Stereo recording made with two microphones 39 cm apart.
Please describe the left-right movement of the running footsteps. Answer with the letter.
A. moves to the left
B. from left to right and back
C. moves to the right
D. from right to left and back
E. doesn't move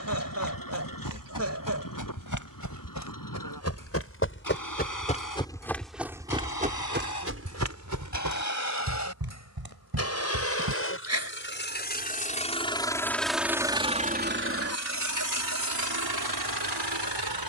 C.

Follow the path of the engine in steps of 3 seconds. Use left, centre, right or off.
left, left, left, left, centre, right.